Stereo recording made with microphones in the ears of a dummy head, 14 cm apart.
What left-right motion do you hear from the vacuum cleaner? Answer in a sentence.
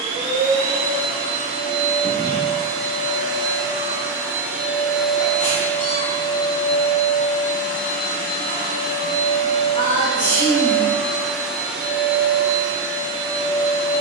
In this clip you hear the vacuum cleaner go left and come back.